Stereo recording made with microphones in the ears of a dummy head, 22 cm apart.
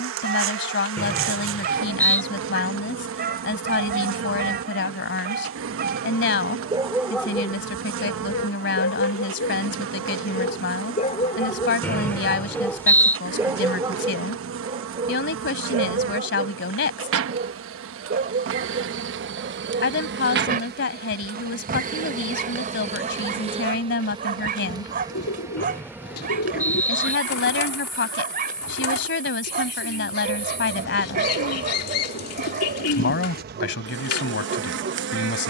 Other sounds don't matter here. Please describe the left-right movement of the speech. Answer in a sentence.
You can hear the speech stay in one place.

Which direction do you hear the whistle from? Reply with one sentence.
You can hear the whistle in the centre.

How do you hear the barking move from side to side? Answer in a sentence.
In this clip you hear the barking move from right to left and back again.